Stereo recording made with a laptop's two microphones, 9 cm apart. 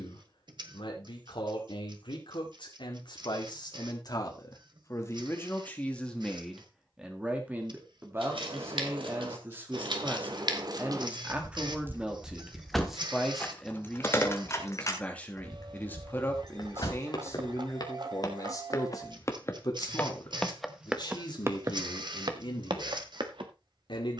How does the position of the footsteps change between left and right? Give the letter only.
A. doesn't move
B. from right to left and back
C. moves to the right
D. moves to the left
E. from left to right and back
C.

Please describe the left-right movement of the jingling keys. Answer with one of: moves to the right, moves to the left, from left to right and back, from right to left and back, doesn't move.
moves to the left.